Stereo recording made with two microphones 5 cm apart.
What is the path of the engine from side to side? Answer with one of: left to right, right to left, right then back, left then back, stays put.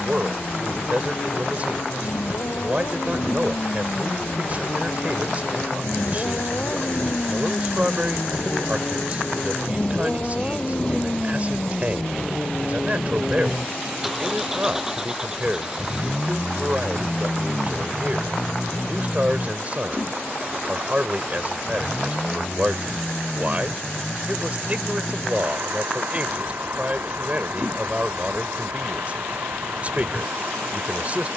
left to right.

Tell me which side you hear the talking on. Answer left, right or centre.
right.